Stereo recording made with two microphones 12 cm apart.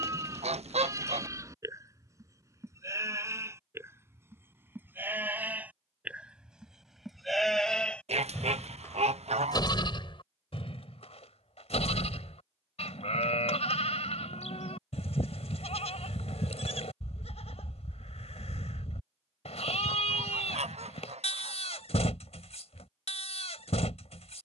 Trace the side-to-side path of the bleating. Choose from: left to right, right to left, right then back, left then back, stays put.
right to left.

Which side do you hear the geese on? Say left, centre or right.
right.